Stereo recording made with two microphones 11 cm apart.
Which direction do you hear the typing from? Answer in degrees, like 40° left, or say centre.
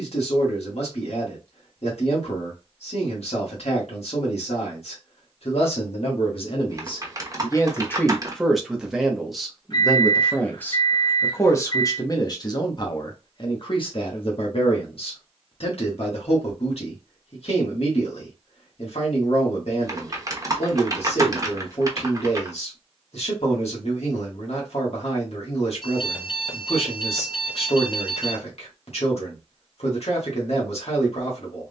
30° right.